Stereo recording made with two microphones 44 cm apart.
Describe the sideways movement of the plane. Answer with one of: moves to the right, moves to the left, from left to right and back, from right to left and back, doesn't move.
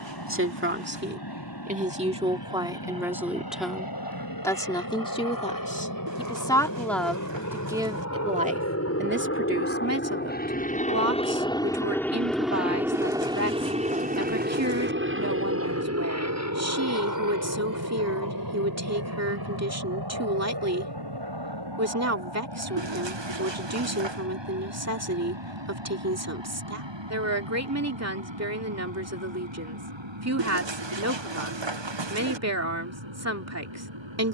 moves to the right.